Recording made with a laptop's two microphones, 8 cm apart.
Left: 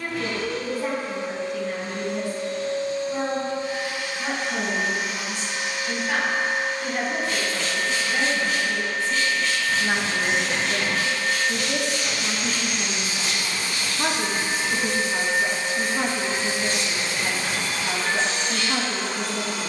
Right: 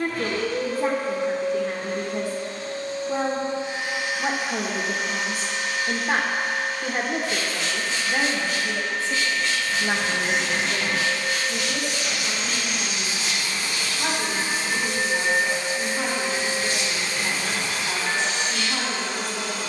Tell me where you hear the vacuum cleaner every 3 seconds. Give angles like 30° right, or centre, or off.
40° right, 10° right, 40° left, 50° left, 50° left, 50° left, 50° left.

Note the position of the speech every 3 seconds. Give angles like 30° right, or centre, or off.
40° right, 40° right, 30° right, 10° left, 40° left, 40° left, 40° left.